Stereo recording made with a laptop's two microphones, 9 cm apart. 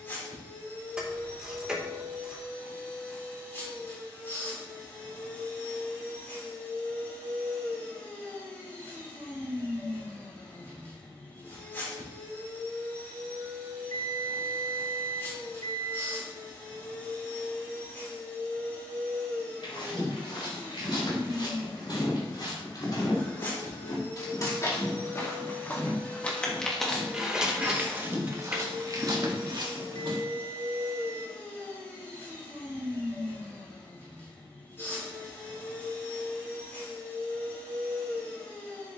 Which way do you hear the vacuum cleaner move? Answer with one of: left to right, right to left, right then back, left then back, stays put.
stays put.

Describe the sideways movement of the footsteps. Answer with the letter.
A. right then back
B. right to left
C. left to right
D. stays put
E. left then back
C.